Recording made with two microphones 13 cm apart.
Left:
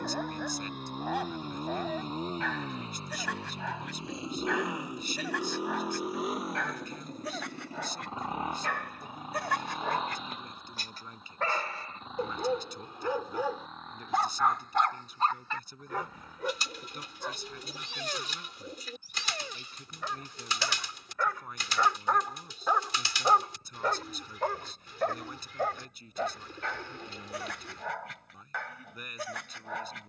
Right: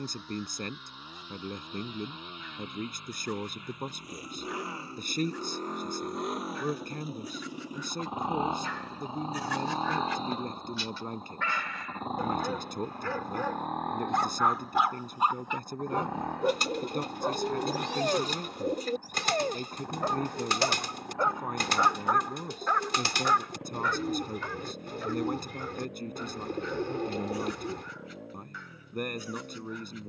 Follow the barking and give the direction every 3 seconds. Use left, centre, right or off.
left, left, left, left, centre, right, right, centre, left, left.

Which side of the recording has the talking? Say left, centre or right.
right.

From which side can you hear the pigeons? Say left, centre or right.
right.